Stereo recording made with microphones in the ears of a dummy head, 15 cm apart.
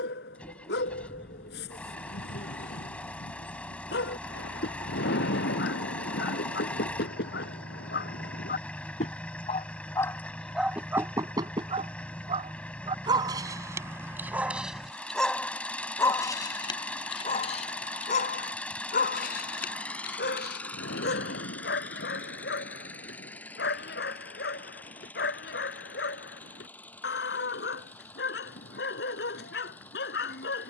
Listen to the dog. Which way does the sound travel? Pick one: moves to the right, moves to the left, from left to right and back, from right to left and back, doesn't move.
from left to right and back.